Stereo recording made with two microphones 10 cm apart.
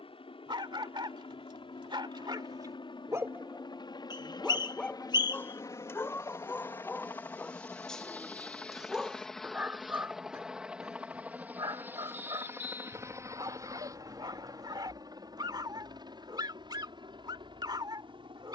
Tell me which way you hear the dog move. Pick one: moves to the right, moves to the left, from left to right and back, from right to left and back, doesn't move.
from right to left and back.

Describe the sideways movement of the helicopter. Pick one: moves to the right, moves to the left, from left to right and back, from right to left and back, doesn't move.
moves to the right.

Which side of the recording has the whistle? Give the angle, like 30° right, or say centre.
40° left.